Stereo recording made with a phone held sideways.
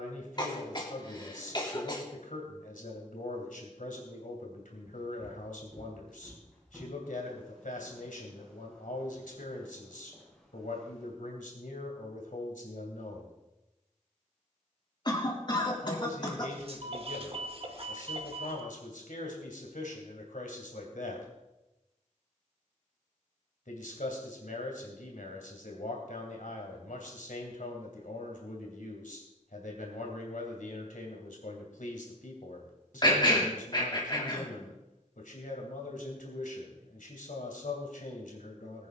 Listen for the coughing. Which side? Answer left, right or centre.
left.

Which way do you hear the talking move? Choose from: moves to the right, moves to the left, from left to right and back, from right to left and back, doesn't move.
doesn't move.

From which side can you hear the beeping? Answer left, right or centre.
right.